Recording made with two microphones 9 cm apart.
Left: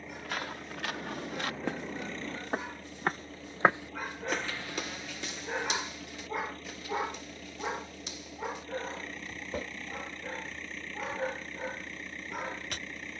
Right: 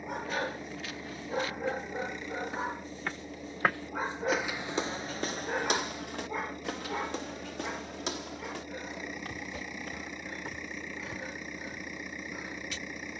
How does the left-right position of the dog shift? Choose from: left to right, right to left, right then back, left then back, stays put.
right to left.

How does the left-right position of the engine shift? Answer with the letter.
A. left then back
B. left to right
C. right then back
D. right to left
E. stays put
E.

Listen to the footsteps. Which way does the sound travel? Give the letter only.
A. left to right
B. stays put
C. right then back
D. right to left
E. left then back
A.